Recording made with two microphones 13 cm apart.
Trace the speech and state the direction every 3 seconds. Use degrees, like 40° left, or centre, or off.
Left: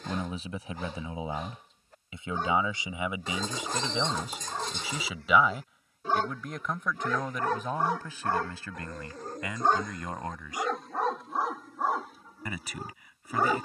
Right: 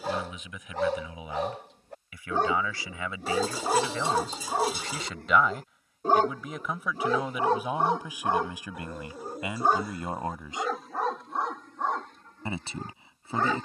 30° left, 10° left, 10° right, 20° right, 30° right.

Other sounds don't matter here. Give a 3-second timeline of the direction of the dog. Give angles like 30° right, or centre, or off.
70° right, 60° right, 30° right, centre, 10° left.